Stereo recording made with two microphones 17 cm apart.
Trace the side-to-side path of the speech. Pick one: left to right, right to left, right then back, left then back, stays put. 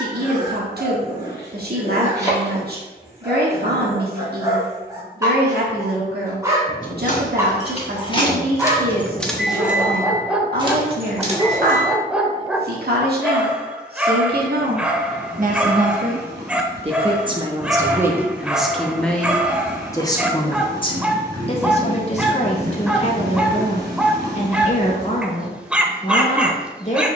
right to left.